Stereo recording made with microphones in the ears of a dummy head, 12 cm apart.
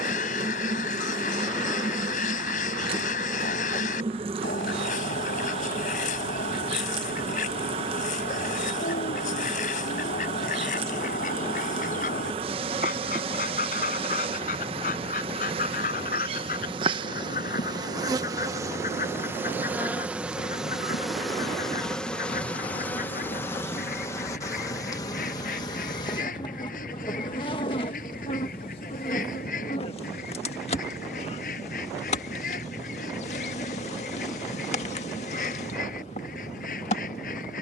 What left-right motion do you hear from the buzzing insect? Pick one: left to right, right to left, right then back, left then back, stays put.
right to left.